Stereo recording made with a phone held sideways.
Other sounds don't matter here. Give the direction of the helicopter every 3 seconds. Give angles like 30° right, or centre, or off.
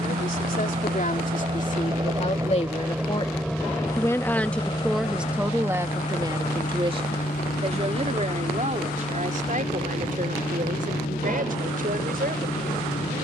30° right, 20° left, 60° left, 70° left, 70° left.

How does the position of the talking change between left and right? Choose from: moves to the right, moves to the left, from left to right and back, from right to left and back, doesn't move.
moves to the right.